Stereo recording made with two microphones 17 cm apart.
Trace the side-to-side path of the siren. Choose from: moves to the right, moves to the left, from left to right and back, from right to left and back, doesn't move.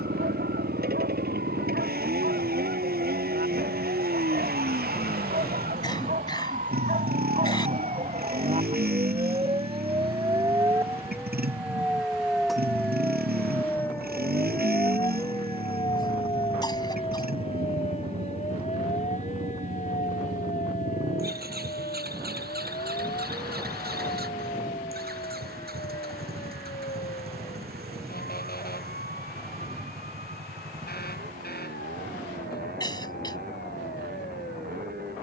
moves to the left.